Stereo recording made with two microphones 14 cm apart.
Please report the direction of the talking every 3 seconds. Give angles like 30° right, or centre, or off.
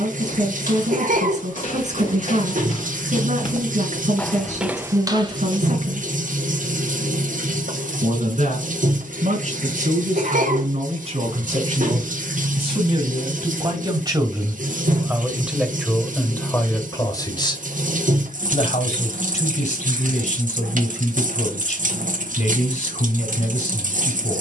60° right, 60° right, 60° right, 50° right, 30° right, 10° left, 60° left, 60° left.